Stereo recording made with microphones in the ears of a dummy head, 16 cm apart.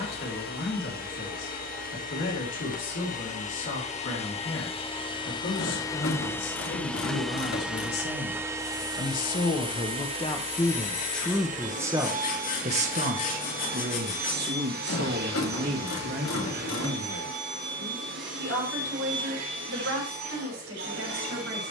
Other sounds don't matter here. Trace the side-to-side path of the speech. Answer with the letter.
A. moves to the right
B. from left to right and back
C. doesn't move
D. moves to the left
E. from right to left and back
A.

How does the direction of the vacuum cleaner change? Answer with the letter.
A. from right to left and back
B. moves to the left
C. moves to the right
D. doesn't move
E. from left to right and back
C.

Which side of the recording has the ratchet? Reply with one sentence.
In this clip you hear the ratchet on the left.